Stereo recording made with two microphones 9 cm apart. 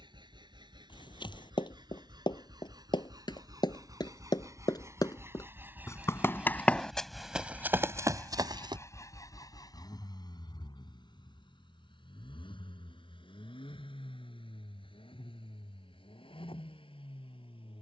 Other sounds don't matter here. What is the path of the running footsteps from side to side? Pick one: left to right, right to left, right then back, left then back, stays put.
left to right.